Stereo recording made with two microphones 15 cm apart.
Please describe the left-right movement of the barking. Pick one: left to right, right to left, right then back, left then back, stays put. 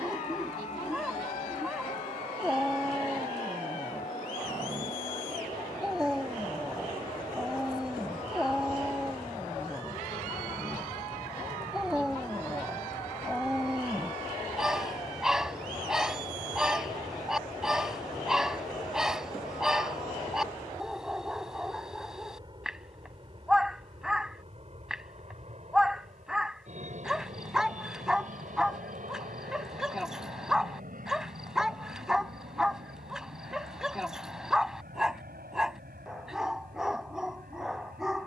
stays put.